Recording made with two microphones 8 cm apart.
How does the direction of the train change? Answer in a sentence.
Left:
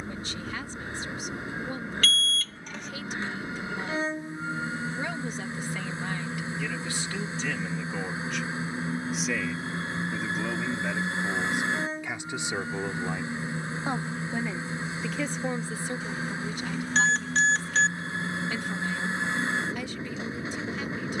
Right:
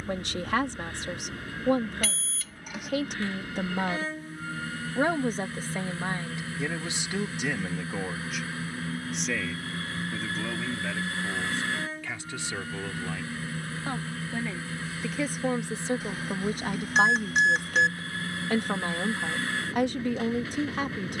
In this clip you hear the train stay in one place.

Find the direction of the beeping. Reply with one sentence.
In this clip you hear the beeping in the centre.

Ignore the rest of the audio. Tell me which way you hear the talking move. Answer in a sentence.
You can hear the talking go left and come back.